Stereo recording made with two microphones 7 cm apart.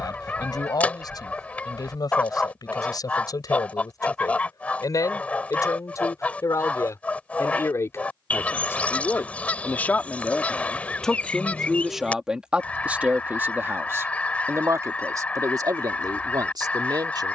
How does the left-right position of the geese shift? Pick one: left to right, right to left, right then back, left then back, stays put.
stays put.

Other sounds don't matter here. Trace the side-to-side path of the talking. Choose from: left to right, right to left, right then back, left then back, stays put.
left to right.